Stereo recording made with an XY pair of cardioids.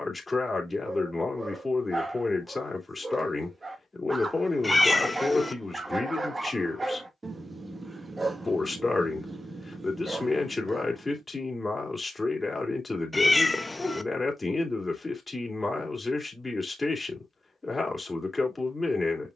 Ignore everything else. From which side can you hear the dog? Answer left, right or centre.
right.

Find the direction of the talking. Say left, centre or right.
left.